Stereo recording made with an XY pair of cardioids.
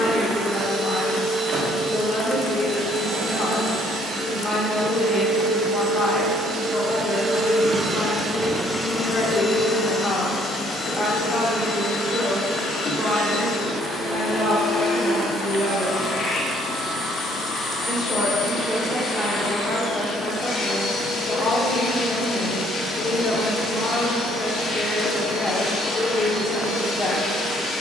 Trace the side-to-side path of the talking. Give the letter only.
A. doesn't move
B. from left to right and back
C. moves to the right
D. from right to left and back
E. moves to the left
B.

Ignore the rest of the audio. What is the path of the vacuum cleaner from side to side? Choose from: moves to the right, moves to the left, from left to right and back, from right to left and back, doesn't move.
moves to the left.